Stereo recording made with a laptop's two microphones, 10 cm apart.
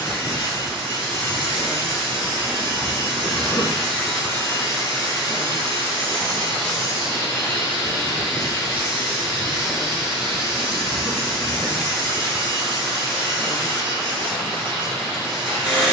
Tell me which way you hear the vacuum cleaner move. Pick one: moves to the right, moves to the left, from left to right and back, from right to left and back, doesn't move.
doesn't move.